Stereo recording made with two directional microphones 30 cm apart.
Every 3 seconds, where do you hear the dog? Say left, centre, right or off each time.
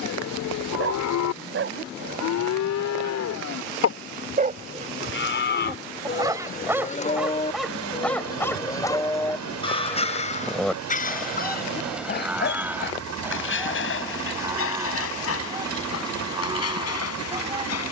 right, right, centre, left, left, left.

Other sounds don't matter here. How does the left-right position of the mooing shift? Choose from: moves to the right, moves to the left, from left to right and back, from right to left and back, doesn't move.
moves to the right.